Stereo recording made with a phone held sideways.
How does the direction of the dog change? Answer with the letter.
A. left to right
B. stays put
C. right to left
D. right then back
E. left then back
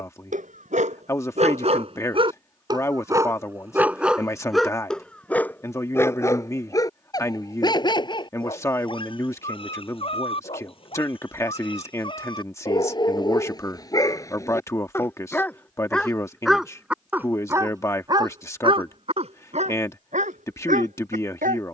E.